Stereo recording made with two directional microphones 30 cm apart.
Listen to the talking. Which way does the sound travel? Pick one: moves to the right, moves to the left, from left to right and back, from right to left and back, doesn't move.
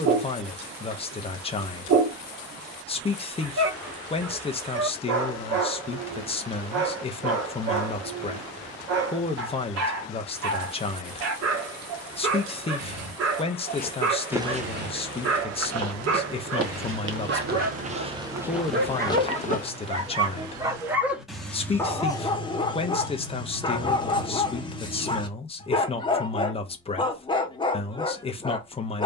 doesn't move.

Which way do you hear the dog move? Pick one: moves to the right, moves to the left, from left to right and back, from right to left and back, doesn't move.
moves to the left.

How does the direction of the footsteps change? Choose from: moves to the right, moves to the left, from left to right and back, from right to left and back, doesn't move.
from left to right and back.